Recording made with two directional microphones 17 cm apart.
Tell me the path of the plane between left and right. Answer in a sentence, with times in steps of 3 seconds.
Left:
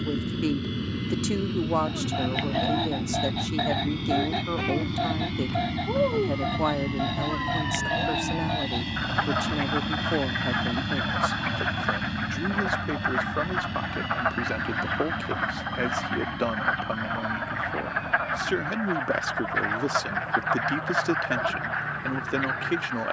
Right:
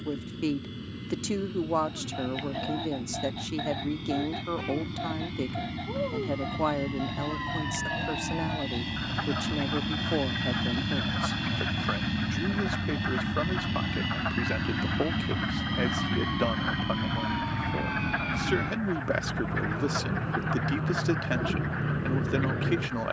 In this clip you hear the plane on the left from 0 s, in the centre from 9 s and on the right from 12 s.